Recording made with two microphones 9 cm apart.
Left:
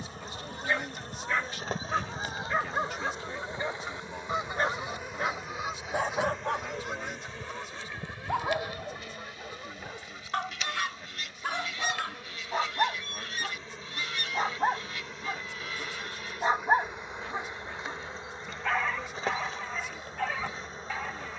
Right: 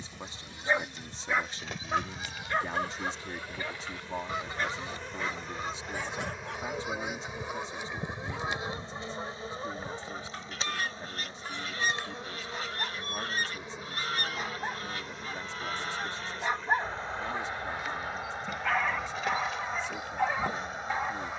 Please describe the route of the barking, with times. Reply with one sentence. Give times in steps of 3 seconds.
You can hear the barking in the centre from 0 s, on the left from 3 s and in the centre from 18 s.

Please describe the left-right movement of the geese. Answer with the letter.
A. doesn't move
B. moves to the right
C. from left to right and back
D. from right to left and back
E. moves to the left
B.